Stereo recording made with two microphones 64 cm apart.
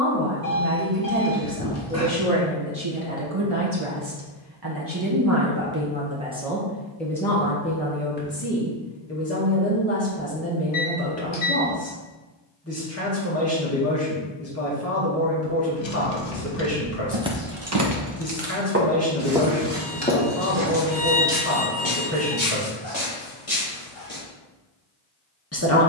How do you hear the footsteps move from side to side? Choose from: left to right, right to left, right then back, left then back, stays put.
right to left.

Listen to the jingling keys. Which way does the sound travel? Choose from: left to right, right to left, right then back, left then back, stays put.
left to right.